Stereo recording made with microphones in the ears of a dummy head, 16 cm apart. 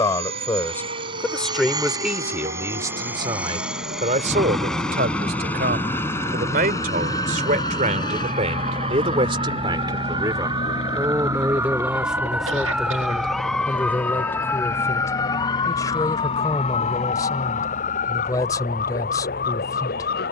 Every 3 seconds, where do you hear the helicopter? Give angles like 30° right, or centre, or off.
20° right, centre, 20° left, 30° left, 40° left, 50° left, 50° left.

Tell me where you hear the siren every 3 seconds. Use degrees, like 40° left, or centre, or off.
60° right, 50° right, 40° right, 20° right, centre, 30° left, 50° left.